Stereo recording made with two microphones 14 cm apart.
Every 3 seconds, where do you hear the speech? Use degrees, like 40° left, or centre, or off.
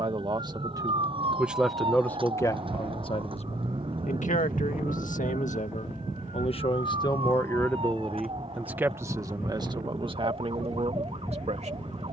centre, 60° left, 20° left, 40° right.